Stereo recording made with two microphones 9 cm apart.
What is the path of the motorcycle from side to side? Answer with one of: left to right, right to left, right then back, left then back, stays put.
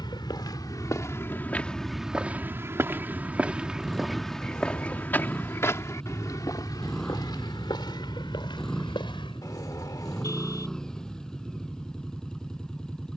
stays put.